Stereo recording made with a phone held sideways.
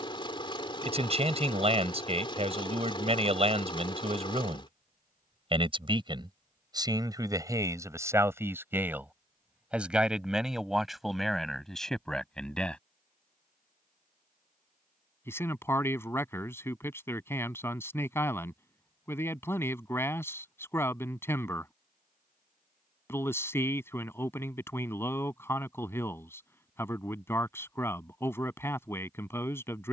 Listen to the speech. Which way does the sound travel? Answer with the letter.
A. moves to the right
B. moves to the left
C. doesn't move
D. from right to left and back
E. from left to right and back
B.